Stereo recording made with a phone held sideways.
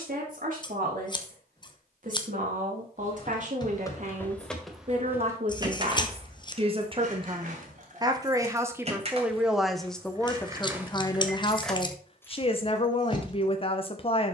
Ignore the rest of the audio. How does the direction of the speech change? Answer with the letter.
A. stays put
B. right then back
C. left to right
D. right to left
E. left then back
D.